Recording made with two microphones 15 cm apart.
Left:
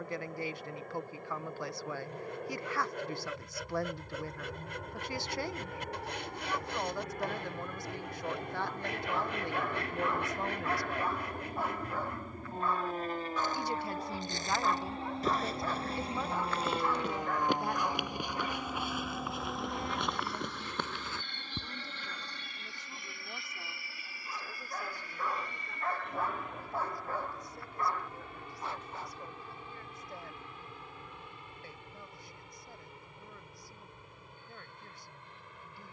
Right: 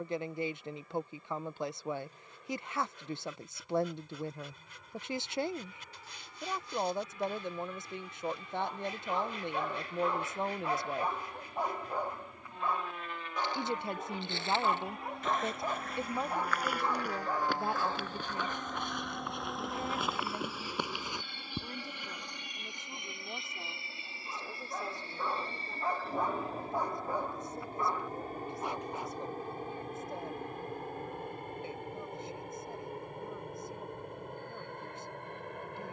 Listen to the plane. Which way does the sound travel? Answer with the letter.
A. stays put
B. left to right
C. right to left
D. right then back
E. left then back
B.